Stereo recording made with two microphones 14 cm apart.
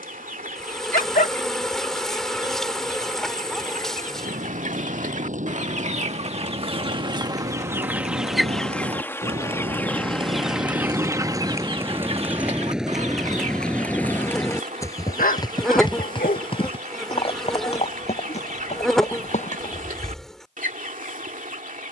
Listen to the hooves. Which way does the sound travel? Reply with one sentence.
In this clip you hear the hooves travel towards the left.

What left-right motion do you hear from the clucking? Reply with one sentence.
You can hear the clucking go left and come back.